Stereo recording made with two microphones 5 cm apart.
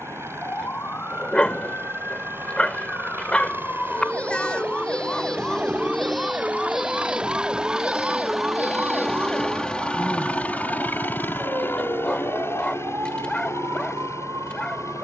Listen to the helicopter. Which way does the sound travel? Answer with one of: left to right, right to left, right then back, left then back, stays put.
right to left.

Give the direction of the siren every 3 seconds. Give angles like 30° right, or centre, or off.
40° left, 20° left, 20° right, 50° right, 70° right.